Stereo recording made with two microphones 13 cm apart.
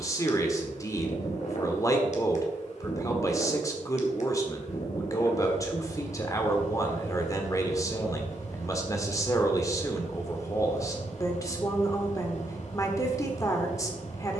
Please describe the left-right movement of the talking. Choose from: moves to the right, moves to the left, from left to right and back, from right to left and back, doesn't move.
doesn't move.